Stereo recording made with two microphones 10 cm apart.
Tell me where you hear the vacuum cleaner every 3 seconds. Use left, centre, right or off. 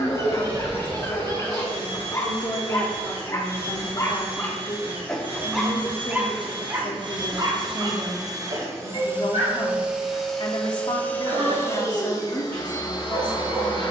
right, right, right, centre, left.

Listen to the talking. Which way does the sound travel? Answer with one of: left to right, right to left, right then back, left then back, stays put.
stays put.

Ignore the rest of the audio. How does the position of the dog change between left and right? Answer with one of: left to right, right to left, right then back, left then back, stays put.
left to right.